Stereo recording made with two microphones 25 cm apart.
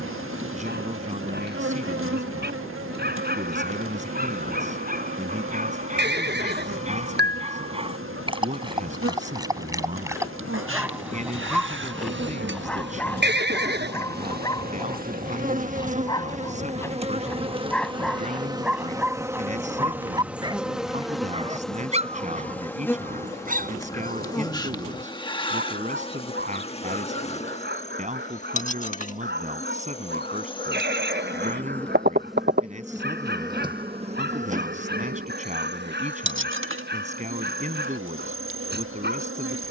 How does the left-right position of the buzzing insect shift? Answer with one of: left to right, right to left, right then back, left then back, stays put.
left then back.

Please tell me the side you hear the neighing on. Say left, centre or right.
right.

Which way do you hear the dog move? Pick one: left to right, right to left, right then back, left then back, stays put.
left then back.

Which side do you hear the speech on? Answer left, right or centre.
right.